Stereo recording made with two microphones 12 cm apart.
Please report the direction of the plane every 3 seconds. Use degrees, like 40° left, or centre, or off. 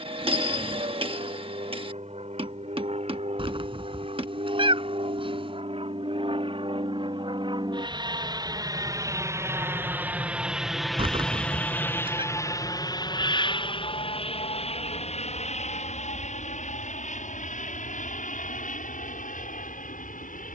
70° right, 60° right, 40° right, 10° right, 40° left, 60° left, 70° left.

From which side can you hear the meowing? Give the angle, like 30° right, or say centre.
40° right.